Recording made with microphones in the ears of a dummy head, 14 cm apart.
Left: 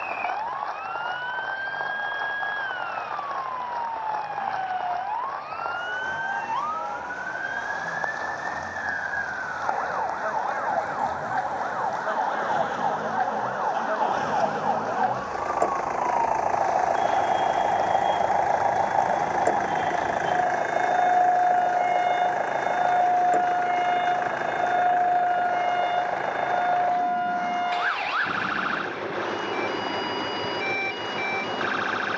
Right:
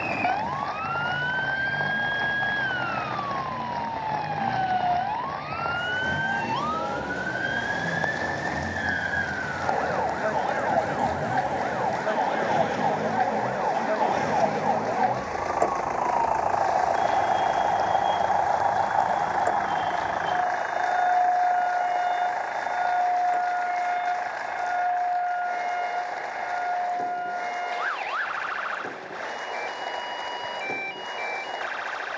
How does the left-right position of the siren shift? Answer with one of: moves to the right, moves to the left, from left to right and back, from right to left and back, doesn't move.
moves to the left.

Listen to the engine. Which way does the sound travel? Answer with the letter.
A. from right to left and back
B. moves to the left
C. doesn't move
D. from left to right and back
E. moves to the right
B.